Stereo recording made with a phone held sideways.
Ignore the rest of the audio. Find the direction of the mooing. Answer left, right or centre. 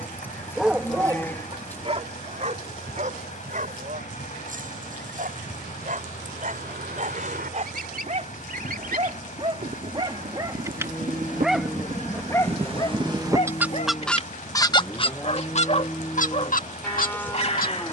centre.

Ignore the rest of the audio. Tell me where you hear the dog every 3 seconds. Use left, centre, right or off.
right, right, right, right, left, left.